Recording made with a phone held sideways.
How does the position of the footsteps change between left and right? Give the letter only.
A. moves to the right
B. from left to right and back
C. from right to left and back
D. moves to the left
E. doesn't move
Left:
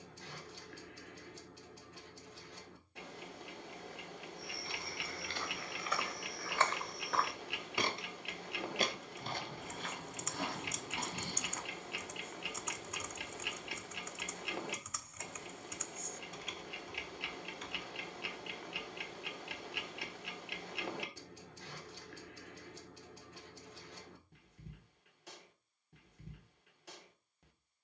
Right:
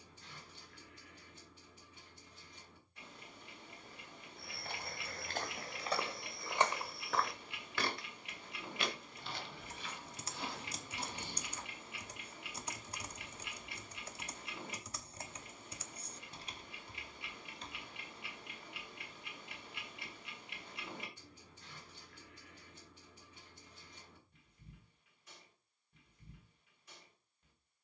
D.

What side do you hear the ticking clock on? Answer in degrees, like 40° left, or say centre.
80° left.